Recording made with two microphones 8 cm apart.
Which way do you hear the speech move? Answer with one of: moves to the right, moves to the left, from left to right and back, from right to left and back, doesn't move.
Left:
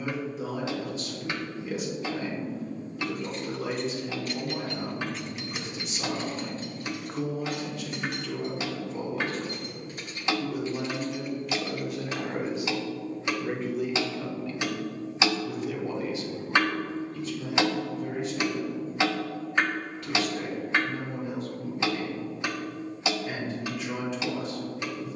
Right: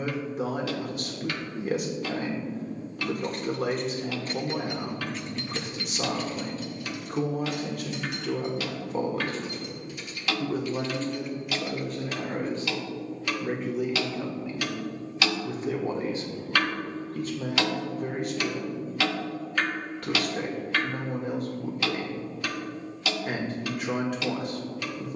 from right to left and back.